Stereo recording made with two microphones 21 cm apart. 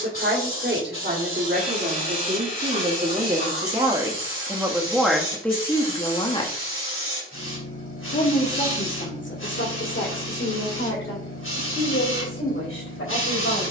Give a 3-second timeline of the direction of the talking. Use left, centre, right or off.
right, centre, left, left, left.